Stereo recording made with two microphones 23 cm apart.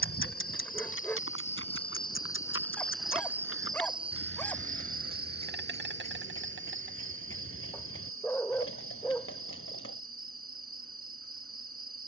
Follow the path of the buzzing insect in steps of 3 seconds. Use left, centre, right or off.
left, right, right, right.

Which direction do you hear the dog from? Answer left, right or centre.
centre.